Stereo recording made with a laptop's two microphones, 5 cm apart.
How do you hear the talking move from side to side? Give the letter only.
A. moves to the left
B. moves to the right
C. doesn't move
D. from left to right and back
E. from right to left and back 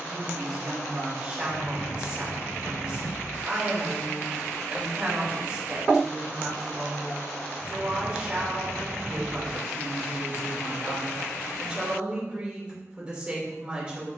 C.